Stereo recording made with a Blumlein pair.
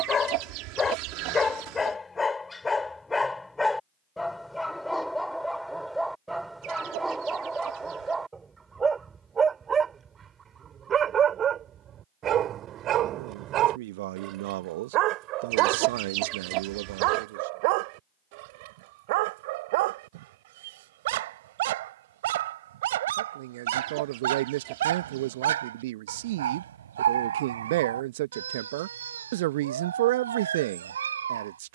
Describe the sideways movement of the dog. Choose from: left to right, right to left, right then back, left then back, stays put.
left to right.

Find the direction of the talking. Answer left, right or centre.
right.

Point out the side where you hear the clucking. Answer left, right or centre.
right.